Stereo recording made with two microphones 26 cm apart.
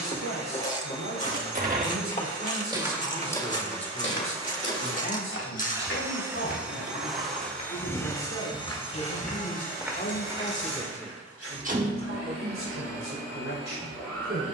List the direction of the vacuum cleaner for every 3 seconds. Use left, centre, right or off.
right, right, centre, left, left.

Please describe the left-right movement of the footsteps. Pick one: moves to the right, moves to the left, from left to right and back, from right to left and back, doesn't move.
from right to left and back.